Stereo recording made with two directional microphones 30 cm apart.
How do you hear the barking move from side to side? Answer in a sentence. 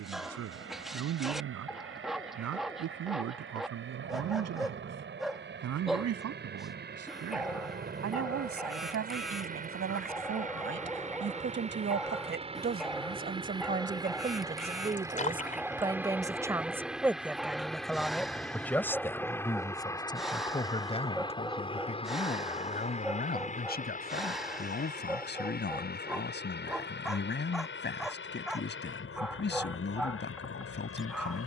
In this clip you hear the barking stay in one place.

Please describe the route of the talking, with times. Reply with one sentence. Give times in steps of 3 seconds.
In this clip you hear the talking on the right from 0 s, in the centre from 15 s and on the left from 21 s.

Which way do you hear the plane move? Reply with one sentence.
In this clip you hear the plane move from right to left.